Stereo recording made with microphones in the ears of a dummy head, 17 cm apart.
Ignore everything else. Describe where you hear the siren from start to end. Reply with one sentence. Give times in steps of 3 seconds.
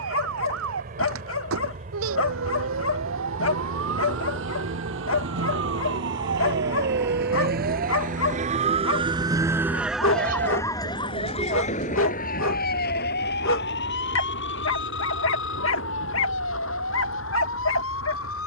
In this clip you hear the siren on the right from 0 s, in the centre from 9 s and on the left from 12 s.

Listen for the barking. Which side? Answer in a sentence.
You can hear the barking on the left.